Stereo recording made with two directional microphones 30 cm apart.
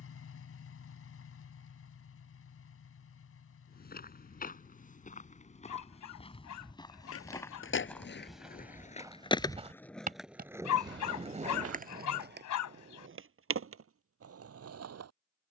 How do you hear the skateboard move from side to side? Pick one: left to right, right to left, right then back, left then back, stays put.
left to right.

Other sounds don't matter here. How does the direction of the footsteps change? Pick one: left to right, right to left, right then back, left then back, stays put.
left to right.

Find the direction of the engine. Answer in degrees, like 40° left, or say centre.
50° left.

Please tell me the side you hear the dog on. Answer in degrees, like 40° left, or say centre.
70° left.